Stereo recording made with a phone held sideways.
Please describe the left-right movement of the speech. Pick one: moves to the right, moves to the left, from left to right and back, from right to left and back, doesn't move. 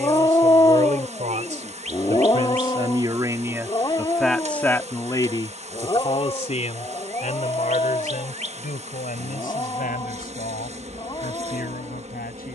moves to the left.